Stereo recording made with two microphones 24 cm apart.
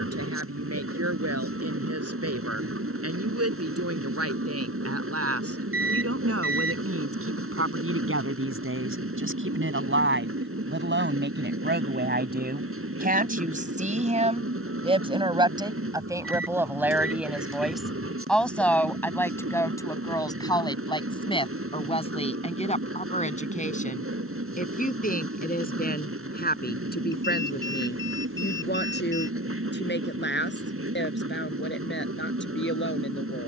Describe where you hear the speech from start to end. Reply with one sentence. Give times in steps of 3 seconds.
You can hear the speech on the right from 0 s, in the centre from 15 s and on the left from 21 s.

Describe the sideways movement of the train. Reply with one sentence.
In this clip you hear the train stay put.